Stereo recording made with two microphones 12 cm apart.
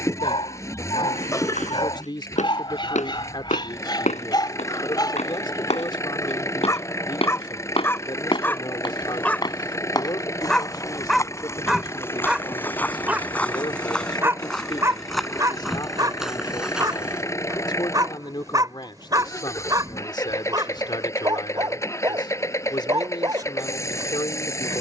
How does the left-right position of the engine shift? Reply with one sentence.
You can hear the engine stay put.